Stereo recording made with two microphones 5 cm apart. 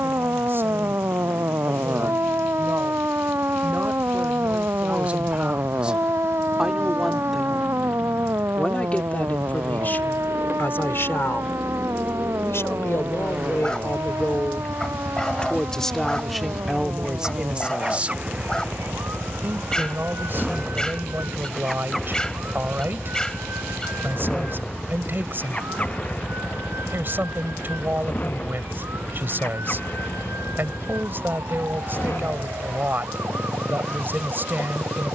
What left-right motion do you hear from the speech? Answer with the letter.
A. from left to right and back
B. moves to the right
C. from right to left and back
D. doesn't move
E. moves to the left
C.